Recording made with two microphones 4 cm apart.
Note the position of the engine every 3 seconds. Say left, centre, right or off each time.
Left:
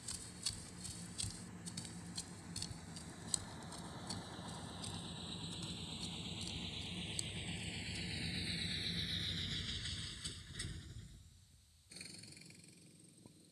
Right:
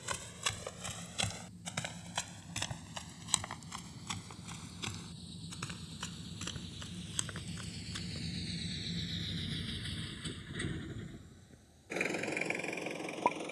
left, left, left, right, right.